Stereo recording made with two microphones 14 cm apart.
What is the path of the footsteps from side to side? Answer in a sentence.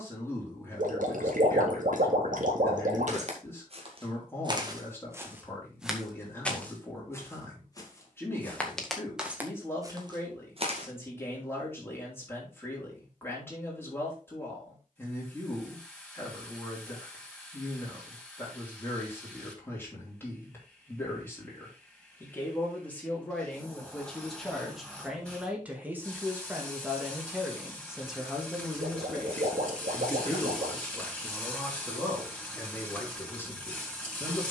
You can hear the footsteps go left and come back.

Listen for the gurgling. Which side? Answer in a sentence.
In this clip you hear the gurgling on the right.